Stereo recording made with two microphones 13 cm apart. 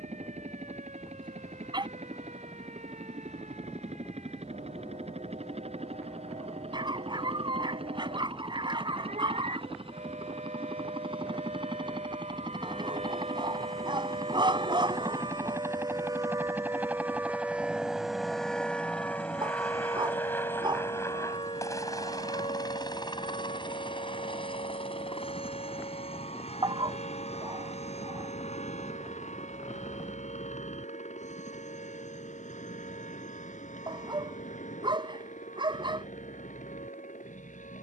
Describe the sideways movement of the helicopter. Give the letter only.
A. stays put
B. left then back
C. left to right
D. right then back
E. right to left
E.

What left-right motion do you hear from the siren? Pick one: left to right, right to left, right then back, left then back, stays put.
right to left.